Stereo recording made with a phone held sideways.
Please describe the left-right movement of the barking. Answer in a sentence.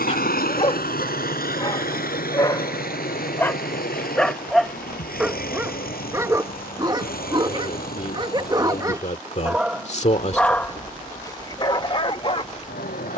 In this clip you hear the barking move from left to right and back again.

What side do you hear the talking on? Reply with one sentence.
In this clip you hear the talking on the left.